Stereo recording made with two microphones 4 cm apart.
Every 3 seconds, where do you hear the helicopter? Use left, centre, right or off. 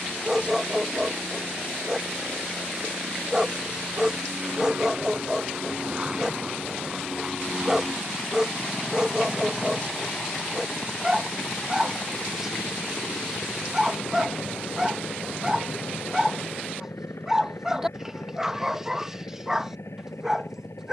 right, right, centre, left, left, left, left.